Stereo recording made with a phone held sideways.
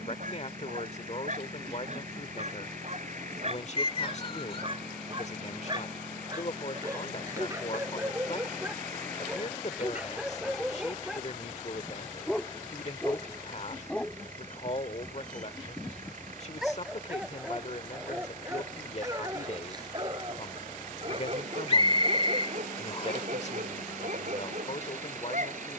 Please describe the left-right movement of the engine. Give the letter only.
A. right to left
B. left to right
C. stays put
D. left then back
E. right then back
C.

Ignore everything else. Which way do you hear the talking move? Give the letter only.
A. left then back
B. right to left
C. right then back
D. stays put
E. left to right
D.